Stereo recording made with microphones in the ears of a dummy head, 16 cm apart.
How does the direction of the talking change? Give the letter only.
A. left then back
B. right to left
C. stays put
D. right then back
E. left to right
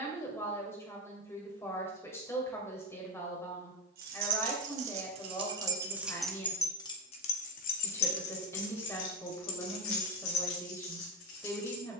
C.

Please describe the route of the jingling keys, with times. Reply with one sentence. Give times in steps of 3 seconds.
You can hear the jingling keys not at all from 0 s, on the right from 3 s and on the left from 6 s.